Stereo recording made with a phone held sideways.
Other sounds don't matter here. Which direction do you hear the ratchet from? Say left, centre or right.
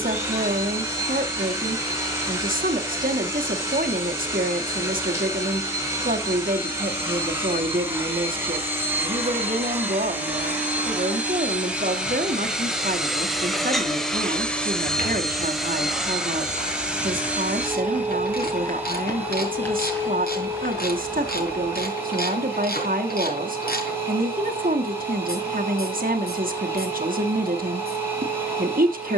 left.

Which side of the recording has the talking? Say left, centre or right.
right.